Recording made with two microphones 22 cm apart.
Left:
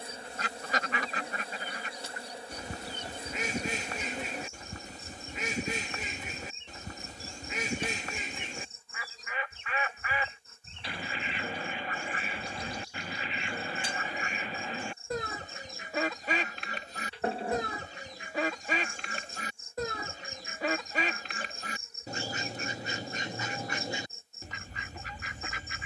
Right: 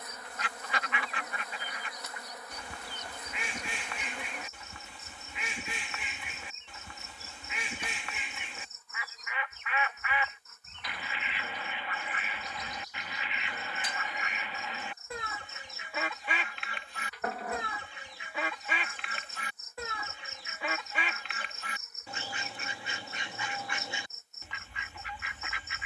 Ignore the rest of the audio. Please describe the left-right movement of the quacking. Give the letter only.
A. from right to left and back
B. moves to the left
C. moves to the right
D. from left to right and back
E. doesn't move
E.